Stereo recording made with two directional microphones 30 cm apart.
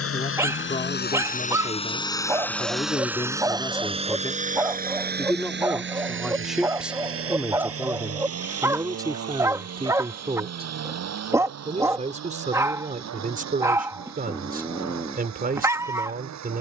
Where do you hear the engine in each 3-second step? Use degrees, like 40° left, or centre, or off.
20° left, 20° right, 50° right, 60° right, 60° right, 60° right.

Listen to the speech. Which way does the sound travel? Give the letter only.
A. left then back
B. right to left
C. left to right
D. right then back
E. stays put
C.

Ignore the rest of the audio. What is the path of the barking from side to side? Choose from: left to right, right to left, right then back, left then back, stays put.
stays put.